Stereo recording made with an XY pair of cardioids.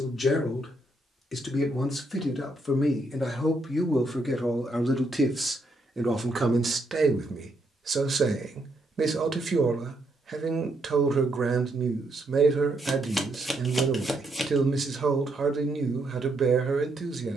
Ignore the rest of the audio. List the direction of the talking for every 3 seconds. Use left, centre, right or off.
left, centre, right, right, right, right.